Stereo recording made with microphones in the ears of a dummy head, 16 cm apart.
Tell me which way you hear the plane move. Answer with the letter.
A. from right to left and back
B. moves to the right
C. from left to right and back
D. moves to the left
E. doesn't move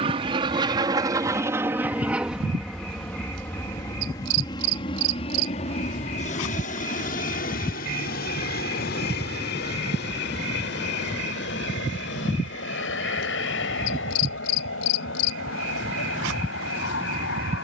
D.